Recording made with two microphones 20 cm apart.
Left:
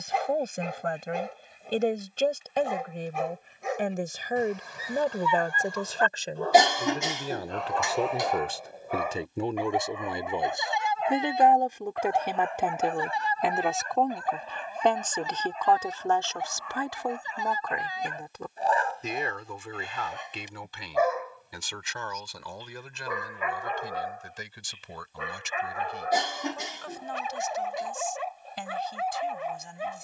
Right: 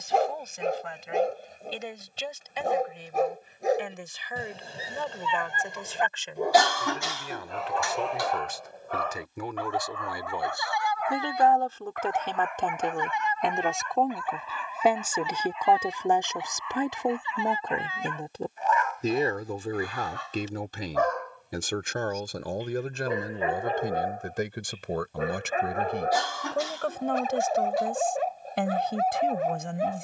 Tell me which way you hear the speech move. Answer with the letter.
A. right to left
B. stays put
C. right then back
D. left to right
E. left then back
D.